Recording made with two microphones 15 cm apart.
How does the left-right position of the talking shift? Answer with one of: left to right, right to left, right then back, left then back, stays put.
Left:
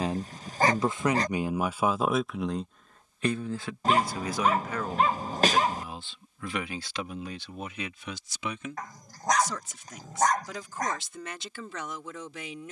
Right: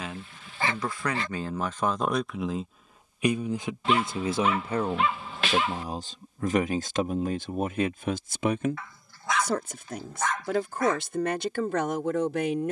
left to right.